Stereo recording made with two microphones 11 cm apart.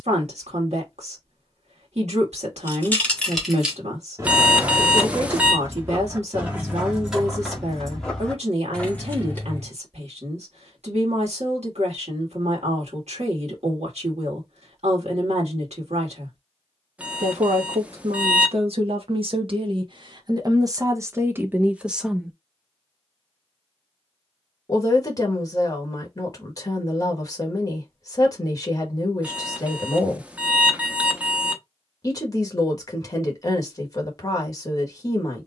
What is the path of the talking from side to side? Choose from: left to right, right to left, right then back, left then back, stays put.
right to left.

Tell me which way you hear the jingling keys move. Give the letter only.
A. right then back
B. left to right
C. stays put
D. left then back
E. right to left
A.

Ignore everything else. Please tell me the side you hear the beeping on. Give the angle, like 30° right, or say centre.
10° right.